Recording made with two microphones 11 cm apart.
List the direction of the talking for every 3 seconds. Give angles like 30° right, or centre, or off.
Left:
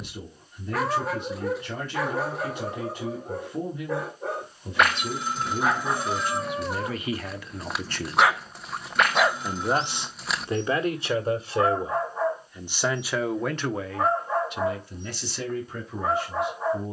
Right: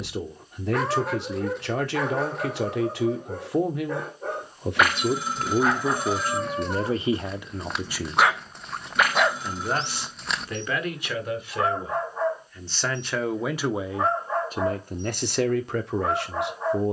70° right, 60° right, 20° right, 20° left, 10° right, 60° right.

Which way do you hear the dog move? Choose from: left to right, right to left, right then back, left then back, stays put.
stays put.